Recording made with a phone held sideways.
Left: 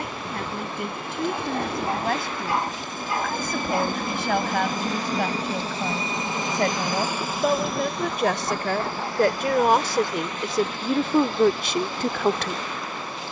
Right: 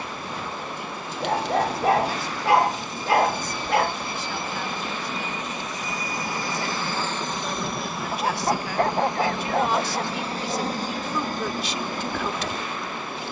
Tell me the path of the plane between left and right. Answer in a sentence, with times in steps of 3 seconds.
In this clip you hear the plane on the left from 0 s, in the centre from 6 s and on the right from 9 s.